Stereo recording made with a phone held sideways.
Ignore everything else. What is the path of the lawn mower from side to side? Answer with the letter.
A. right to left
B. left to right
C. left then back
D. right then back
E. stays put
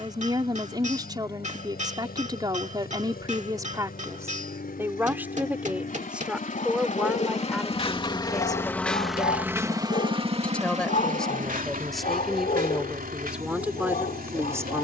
B.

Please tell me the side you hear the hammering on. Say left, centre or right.
right.